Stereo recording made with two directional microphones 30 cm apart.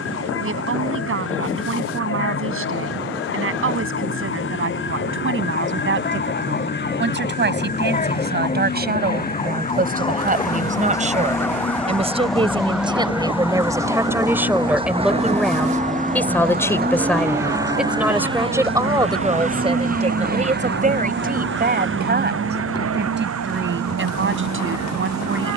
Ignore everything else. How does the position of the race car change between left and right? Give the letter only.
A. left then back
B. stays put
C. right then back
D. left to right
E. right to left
D.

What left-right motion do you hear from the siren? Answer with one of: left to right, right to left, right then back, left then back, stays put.
left to right.